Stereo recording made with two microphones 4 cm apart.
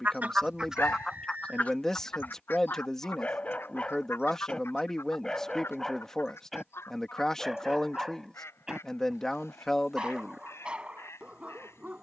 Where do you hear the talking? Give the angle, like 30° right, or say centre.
10° left.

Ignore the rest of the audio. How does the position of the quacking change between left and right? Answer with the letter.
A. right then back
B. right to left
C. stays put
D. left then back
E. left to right
B.